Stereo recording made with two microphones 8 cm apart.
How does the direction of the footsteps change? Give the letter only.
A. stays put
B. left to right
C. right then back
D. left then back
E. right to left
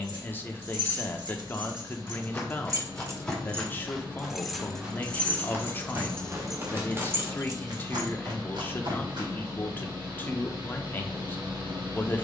B.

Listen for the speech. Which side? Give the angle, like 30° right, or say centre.
20° left.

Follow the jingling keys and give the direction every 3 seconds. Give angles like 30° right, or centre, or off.
60° right, centre, 20° right, off.